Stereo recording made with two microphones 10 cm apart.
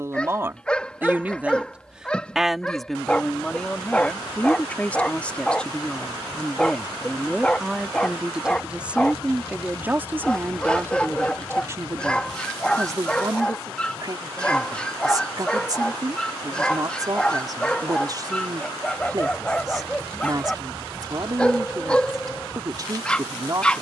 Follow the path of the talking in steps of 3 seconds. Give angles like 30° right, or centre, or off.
10° right, 10° left, centre, 20° right, 40° right, 40° right, 40° right, 40° right.